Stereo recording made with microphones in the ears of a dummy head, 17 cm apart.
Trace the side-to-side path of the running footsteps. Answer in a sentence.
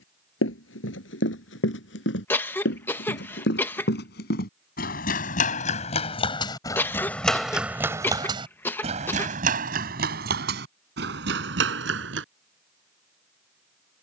You can hear the running footsteps move from left to right.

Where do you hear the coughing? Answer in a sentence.
In this clip you hear the coughing in the centre.